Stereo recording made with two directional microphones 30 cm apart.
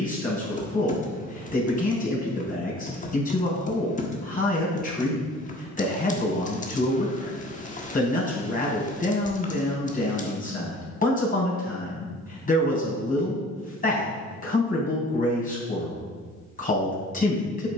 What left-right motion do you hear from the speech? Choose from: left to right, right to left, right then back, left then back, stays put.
stays put.